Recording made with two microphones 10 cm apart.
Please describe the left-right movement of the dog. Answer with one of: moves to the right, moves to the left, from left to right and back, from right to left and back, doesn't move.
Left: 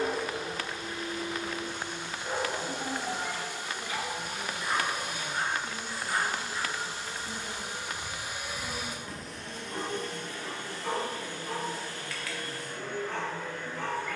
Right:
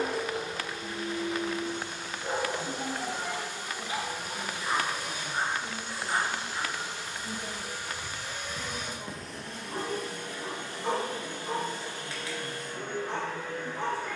doesn't move.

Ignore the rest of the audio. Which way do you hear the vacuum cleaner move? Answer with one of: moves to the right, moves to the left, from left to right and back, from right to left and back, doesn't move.
moves to the right.